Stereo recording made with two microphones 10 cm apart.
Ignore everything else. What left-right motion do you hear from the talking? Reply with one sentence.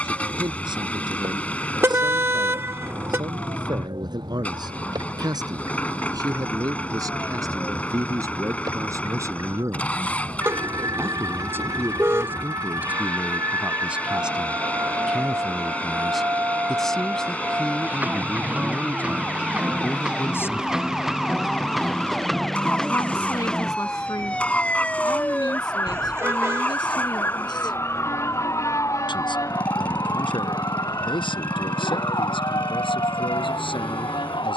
You can hear the talking move to the left.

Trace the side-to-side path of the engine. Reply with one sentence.
In this clip you hear the engine stay in one place.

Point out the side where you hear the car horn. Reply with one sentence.
In this clip you hear the car horn on the right.